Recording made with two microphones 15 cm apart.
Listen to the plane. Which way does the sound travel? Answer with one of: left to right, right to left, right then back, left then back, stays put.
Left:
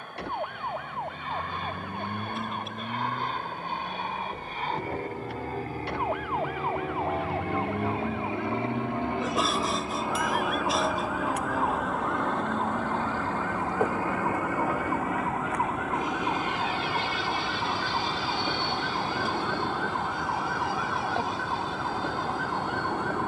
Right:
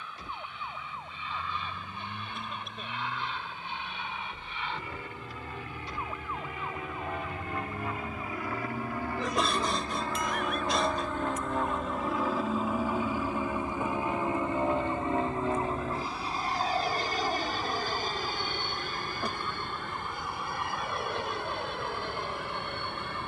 left to right.